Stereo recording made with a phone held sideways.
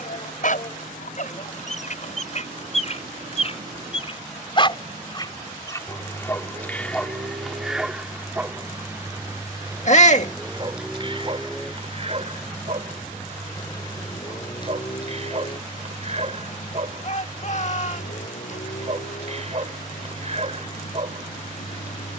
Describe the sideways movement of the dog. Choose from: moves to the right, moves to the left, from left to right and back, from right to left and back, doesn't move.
moves to the right.